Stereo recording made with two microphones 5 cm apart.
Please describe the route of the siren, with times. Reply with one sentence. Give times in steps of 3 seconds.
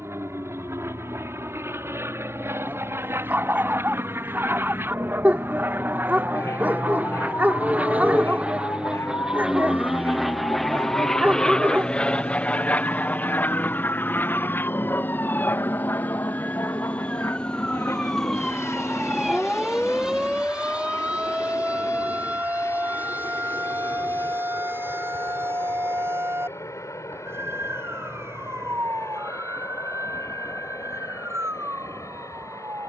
You can hear the siren on the left from 0 s, in the centre from 18 s and on the right from 21 s.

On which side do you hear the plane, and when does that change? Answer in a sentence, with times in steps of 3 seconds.
You can hear the plane on the right from 0 s, in the centre from 9 s and on the left from 12 s.